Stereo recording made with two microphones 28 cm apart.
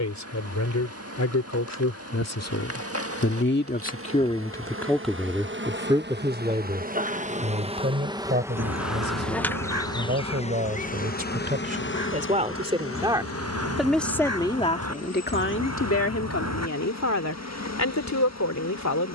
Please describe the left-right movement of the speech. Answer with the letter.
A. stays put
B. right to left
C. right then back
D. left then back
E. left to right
C.